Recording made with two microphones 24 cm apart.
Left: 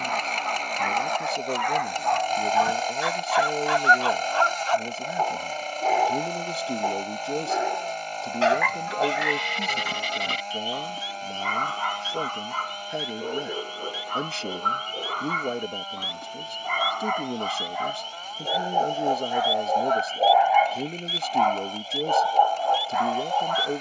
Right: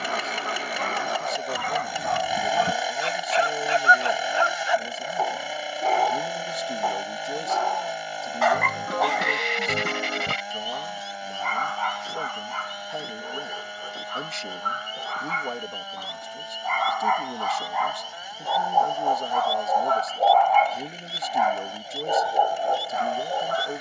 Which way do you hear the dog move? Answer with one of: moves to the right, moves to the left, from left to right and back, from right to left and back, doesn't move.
from right to left and back.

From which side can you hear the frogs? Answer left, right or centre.
right.